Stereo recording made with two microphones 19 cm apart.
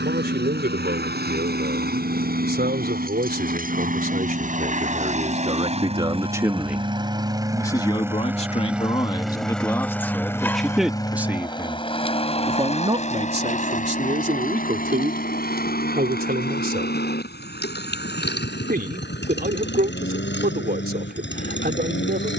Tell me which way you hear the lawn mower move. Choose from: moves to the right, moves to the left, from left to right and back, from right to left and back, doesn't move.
moves to the left.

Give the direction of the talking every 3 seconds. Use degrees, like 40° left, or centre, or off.
60° right, 40° right, 10° left, centre, 40° right, 50° right, 50° right, 50° right.